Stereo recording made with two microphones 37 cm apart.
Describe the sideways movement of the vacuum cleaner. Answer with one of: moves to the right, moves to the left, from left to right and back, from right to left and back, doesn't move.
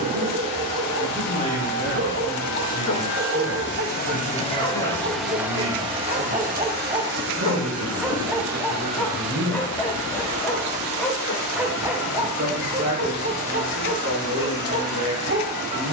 moves to the right.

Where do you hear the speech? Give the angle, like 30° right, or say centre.
40° right.